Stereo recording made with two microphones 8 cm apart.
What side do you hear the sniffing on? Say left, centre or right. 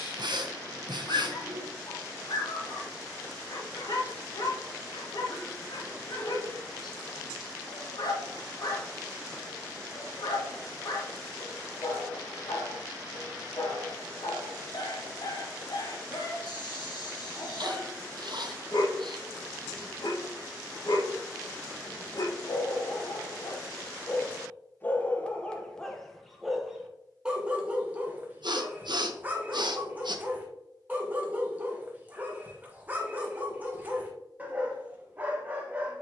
right.